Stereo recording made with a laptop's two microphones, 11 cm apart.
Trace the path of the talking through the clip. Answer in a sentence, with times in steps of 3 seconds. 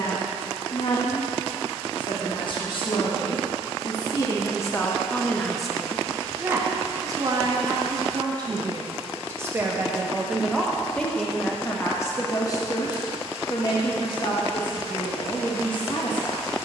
You can hear the talking on the left from 0 s, on the right from 6 s, in the centre from 9 s and on the left from 12 s.